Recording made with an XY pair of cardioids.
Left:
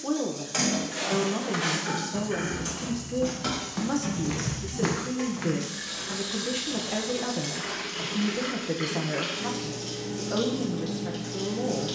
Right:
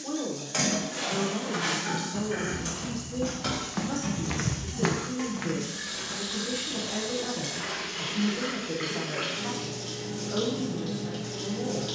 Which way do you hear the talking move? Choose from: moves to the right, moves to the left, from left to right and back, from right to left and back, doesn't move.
doesn't move.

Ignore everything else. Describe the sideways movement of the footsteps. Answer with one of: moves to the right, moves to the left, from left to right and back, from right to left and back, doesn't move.
from left to right and back.